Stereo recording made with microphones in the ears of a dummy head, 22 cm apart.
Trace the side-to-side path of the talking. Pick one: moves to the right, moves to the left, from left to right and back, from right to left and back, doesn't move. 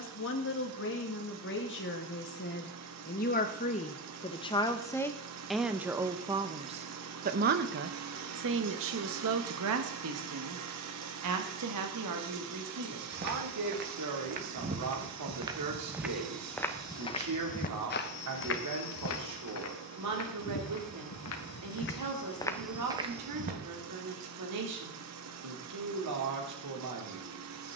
moves to the right.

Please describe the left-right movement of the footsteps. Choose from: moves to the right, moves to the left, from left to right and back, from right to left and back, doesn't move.
from right to left and back.